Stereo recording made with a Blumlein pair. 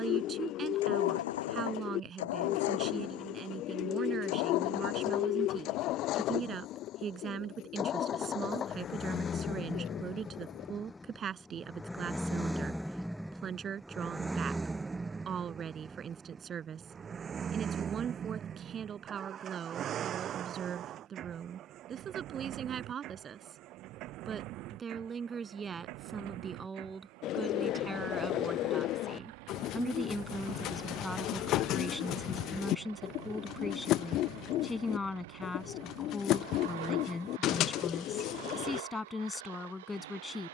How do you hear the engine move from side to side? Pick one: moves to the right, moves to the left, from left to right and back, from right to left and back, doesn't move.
moves to the right.